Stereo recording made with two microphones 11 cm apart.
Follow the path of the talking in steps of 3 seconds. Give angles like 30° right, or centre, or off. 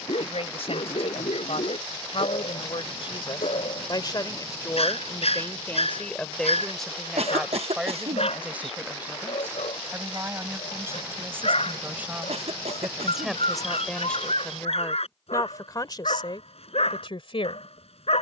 70° left, 30° left, centre, 20° right, centre, 50° left.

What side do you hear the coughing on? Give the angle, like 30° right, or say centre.
70° right.